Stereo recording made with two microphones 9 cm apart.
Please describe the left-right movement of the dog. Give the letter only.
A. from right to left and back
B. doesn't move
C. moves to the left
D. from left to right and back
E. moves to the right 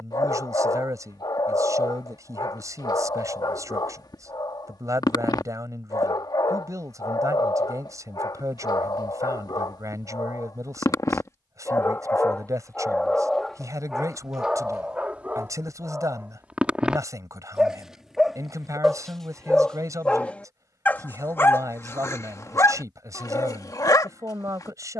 D.